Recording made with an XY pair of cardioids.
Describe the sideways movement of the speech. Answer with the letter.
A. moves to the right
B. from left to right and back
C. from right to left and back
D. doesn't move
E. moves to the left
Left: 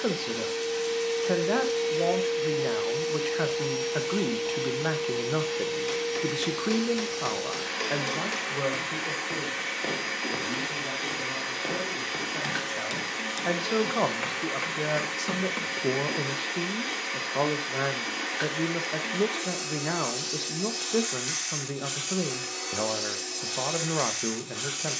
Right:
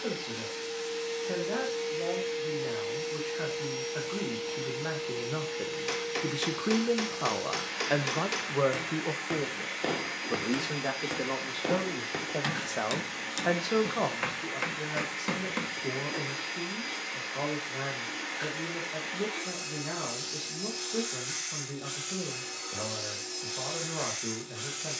B.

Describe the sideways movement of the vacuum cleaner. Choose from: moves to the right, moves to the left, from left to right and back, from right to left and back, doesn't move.
doesn't move.